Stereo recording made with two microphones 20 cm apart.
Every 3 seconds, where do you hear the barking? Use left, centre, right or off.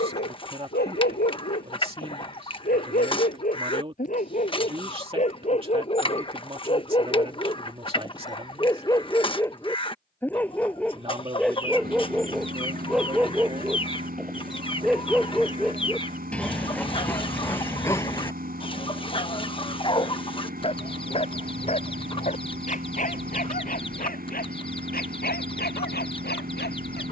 left, left, left, centre, centre, centre, left, left, left.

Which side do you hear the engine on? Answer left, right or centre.
right.